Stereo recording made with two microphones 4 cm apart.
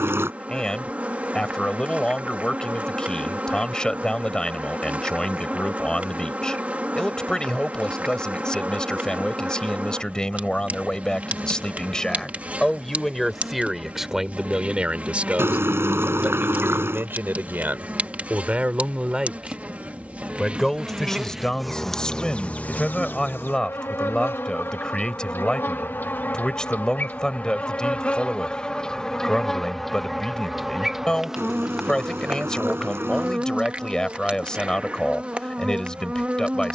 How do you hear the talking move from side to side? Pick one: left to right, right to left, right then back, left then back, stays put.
right then back.